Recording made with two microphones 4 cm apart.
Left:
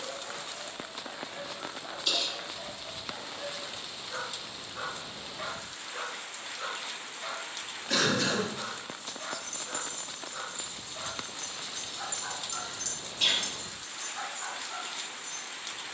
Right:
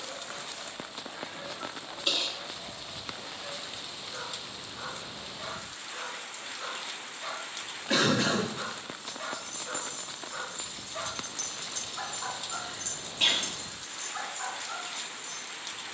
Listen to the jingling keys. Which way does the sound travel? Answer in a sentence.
You can hear the jingling keys go from the left side to the right.